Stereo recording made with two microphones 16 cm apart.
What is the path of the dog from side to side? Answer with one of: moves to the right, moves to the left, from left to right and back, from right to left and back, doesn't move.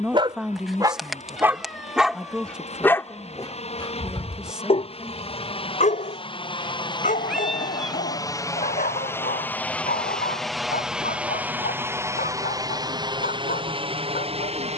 moves to the left.